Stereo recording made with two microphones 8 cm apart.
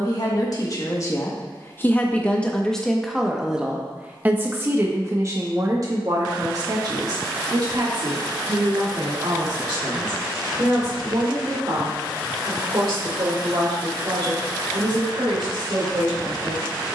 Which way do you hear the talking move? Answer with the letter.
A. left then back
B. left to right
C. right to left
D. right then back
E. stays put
B.